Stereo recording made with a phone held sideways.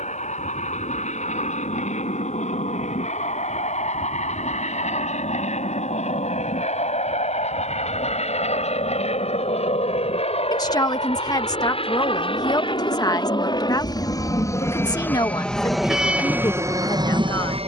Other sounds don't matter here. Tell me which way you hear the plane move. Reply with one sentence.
In this clip you hear the plane go from the left side to the right.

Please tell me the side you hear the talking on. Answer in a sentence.
You can hear the talking on the left.